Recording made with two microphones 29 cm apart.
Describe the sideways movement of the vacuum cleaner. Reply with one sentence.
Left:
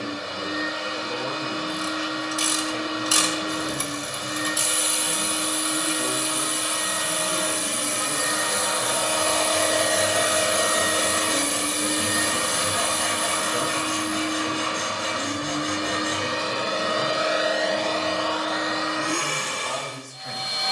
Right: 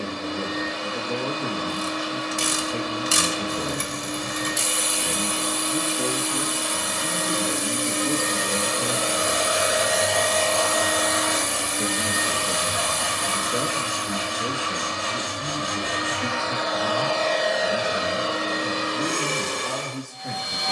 In this clip you hear the vacuum cleaner go left and come back.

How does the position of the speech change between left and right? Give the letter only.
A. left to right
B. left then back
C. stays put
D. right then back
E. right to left
C.